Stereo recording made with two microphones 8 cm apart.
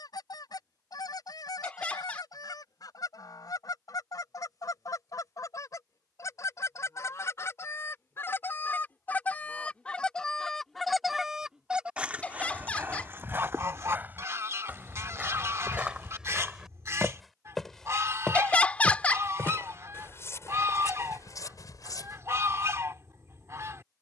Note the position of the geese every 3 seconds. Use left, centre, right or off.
left, left, left, centre, right, right, right, right.